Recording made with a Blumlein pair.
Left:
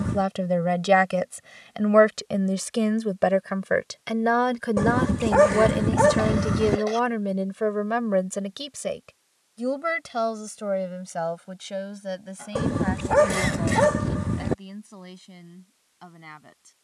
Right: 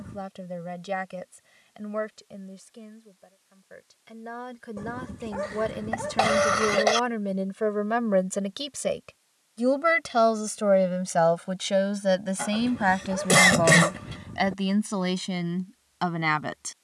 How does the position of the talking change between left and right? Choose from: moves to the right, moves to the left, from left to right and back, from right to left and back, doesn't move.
moves to the right.